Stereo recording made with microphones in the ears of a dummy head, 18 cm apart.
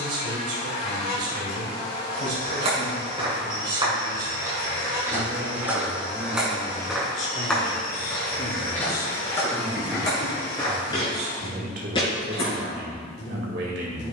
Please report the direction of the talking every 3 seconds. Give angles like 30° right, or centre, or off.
60° right, 50° right, 20° left, 20° right, 60° right.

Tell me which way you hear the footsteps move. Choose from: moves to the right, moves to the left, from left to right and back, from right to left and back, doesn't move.
moves to the left.